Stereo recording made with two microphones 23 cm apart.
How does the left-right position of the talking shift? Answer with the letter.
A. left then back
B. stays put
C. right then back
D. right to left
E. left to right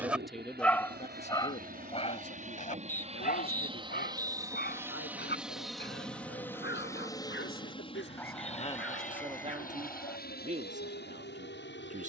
A.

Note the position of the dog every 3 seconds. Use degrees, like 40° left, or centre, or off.
20° left, 40° left, 50° left, 60° left.